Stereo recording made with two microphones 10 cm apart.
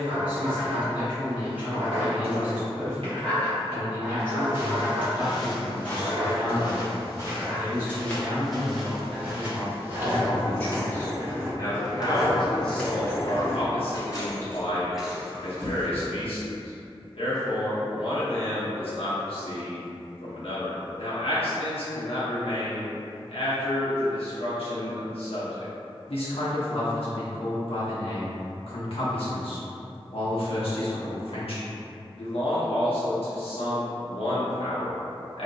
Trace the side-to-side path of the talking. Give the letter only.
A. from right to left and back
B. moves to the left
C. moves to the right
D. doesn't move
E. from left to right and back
B.